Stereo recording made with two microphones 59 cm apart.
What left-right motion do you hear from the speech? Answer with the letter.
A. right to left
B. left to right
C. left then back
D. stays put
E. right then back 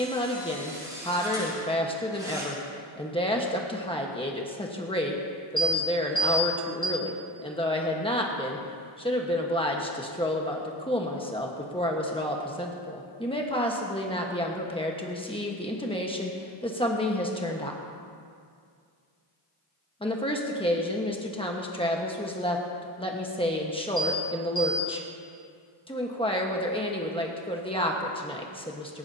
D.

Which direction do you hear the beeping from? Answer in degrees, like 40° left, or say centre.
50° left.